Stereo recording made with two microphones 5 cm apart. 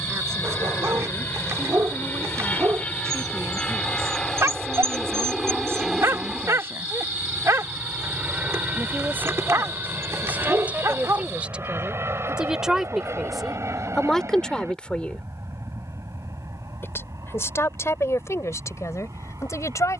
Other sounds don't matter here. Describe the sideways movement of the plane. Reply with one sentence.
In this clip you hear the plane move to the right.